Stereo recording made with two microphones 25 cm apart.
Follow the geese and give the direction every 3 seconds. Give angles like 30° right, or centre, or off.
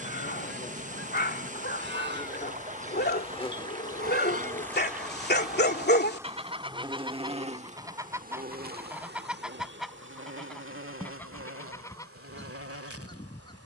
50° right, 30° right, 10° right, centre, 20° left.